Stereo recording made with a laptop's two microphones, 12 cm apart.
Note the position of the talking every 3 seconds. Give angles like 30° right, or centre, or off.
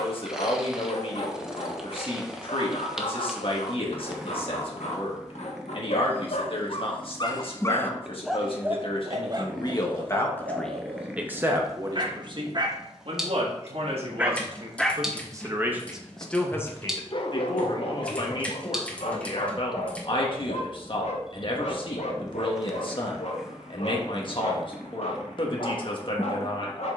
50° left, 50° left, 50° left, 10° left, 50° right, 10° left, 50° left, 50° left, 50° left.